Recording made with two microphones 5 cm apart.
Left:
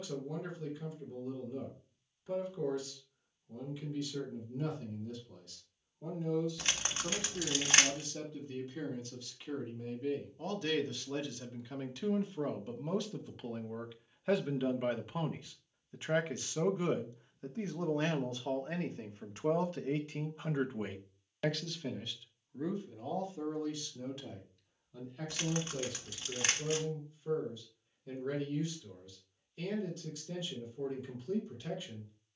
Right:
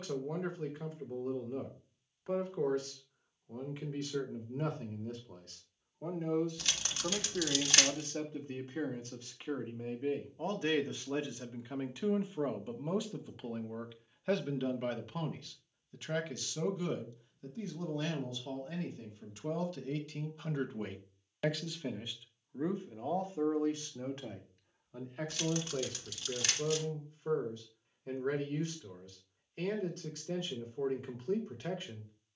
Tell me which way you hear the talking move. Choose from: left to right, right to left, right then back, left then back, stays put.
left then back.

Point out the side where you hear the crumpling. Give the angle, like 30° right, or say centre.
30° left.